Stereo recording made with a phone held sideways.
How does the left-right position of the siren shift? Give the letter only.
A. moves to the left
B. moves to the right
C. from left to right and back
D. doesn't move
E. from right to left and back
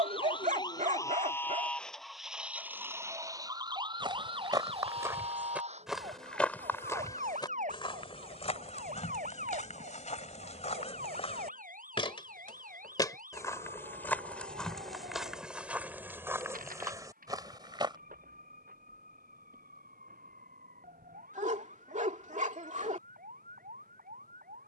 B.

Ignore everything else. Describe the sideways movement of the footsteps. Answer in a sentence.
In this clip you hear the footsteps move from right to left and back again.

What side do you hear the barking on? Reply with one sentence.
In this clip you hear the barking on the right.